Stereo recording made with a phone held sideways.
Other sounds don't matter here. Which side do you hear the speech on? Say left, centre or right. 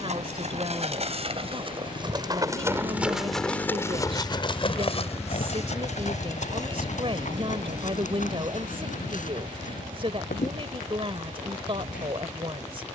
right.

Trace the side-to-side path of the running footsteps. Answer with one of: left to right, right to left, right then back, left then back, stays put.
right to left.